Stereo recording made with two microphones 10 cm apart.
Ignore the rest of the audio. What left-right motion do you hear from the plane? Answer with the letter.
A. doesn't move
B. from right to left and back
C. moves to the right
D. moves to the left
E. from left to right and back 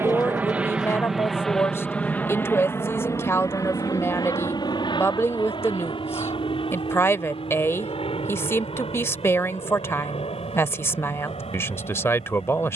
D.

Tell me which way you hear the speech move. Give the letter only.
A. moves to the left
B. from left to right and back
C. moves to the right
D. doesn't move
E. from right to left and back
D.